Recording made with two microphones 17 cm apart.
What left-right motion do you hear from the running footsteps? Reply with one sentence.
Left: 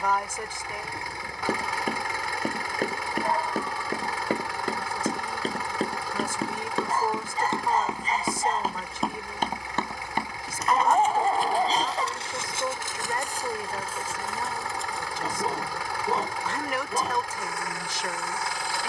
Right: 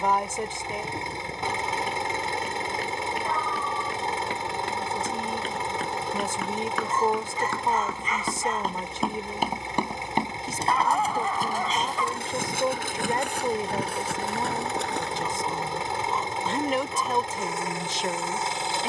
You can hear the running footsteps go from the left side to the right.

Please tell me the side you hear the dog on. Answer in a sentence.
In this clip you hear the dog on the left.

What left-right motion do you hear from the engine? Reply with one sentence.
You can hear the engine stay put.